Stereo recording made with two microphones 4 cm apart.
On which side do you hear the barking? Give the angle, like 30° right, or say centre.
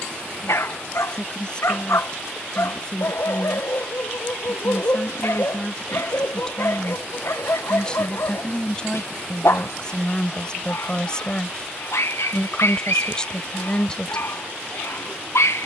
80° left.